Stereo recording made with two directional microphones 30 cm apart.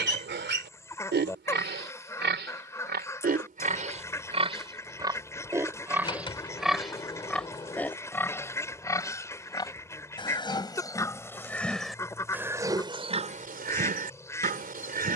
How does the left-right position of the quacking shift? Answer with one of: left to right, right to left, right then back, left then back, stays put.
stays put.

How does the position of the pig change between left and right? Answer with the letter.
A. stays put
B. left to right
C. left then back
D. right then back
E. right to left
C.